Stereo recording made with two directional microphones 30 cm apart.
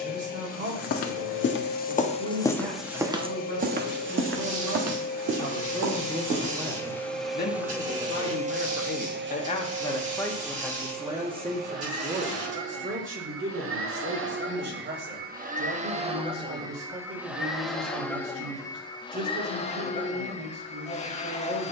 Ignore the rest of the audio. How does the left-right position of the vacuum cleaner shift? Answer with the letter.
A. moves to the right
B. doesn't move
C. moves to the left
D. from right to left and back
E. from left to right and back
E.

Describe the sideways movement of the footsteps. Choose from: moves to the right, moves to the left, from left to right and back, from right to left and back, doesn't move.
moves to the right.